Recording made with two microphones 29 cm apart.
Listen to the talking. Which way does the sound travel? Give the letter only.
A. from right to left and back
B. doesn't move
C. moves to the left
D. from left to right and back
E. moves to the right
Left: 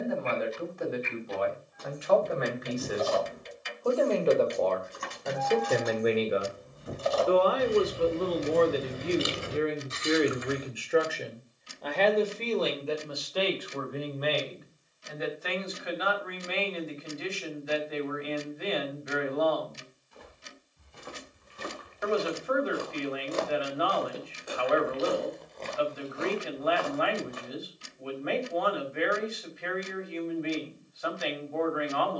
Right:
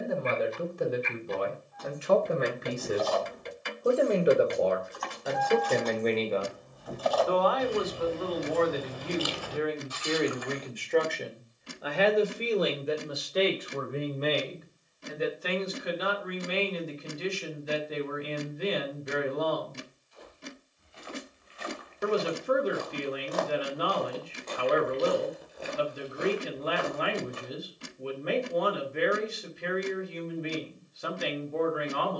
A.